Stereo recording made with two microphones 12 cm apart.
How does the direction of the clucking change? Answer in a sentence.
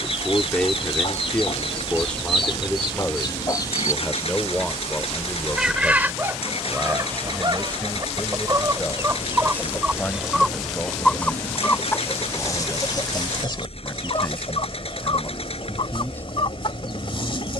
You can hear the clucking move from left to right and back again.